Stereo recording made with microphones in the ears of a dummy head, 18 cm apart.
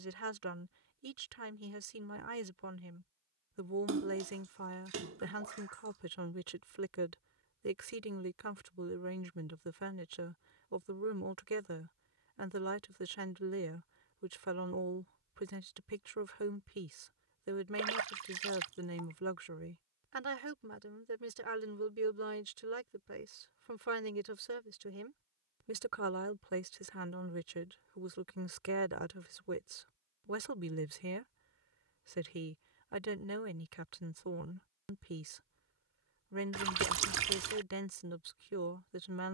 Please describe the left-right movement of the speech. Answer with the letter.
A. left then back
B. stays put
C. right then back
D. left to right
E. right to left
B.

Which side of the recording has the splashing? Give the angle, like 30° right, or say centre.
70° right.